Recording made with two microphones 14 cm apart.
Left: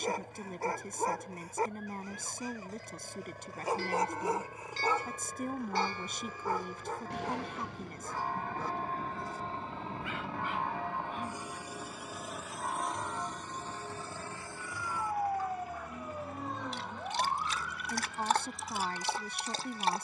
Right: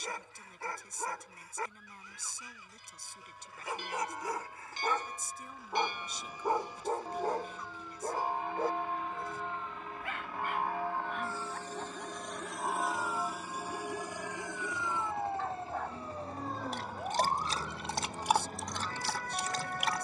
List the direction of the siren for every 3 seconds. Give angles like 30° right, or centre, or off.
60° left, 60° left, 50° left, 50° left, 30° left, centre, 50° right.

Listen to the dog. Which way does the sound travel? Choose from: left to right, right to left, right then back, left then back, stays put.
right then back.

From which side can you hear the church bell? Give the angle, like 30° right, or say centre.
20° right.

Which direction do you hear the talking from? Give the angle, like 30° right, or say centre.
60° left.